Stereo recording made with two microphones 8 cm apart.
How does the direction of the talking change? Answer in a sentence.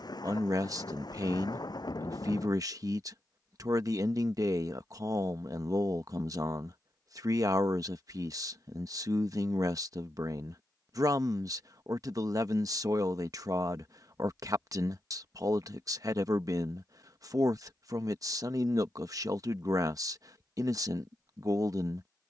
In this clip you hear the talking stay put.